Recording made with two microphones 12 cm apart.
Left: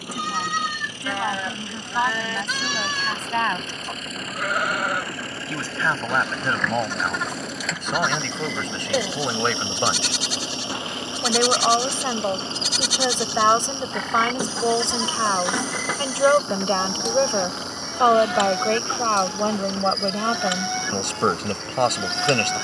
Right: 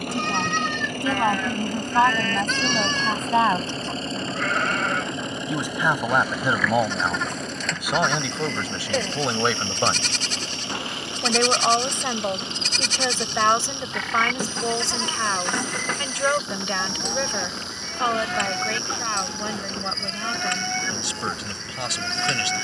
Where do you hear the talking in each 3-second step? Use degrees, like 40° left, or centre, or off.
30° right, 20° right, 10° right, centre, 20° left, 30° left, 50° left, 50° left.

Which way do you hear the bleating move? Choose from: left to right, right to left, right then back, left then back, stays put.
stays put.